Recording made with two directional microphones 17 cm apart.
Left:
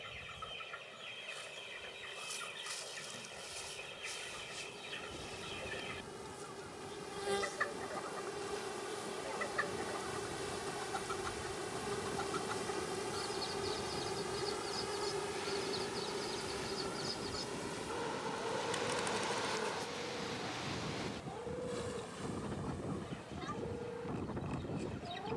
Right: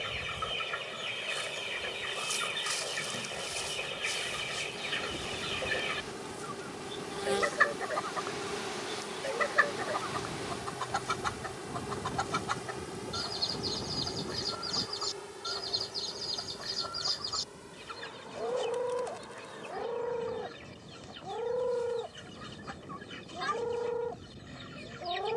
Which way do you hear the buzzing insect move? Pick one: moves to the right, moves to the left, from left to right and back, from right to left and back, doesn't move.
moves to the left.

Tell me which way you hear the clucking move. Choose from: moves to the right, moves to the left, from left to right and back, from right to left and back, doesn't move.
doesn't move.